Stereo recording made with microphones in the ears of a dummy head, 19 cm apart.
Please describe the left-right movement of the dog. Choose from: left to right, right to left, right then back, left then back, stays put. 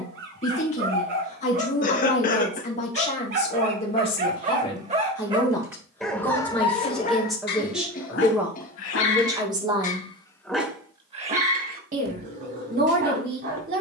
left then back.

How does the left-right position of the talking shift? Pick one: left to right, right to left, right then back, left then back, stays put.
left to right.